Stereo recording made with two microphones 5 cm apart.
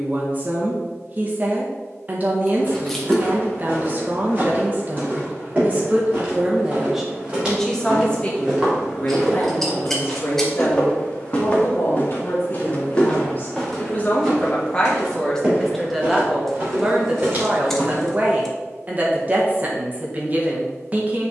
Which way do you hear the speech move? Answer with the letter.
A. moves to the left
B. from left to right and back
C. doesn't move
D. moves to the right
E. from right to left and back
E.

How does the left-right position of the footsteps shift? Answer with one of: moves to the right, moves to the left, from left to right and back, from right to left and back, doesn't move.
from right to left and back.